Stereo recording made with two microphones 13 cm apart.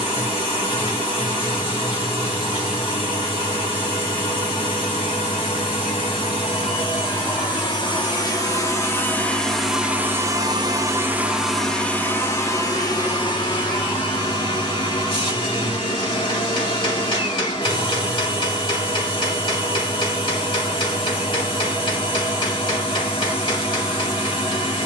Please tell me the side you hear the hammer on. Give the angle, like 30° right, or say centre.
40° left.